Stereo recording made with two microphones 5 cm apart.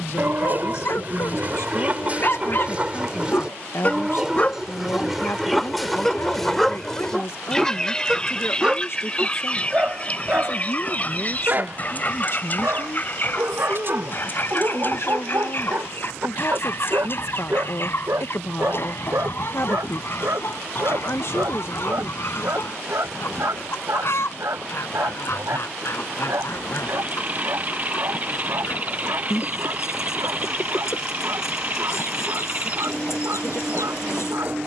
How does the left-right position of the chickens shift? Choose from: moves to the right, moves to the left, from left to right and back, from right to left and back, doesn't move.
moves to the left.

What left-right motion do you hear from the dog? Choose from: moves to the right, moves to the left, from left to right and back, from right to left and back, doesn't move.
moves to the right.